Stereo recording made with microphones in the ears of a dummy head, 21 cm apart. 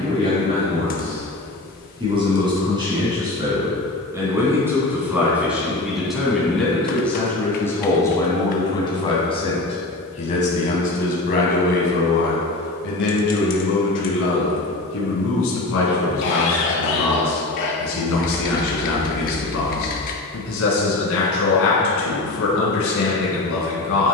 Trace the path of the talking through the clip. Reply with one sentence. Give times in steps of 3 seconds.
In this clip you hear the talking on the right from 0 s, in the centre from 3 s and on the left from 9 s.